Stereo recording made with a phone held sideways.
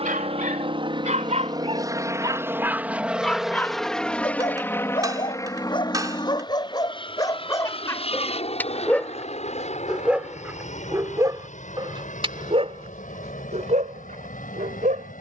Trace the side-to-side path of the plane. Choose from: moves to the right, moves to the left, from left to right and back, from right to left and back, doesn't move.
moves to the left.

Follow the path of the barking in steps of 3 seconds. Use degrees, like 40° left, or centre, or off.
40° right, 30° left, 20° left, 10° right, 50° right.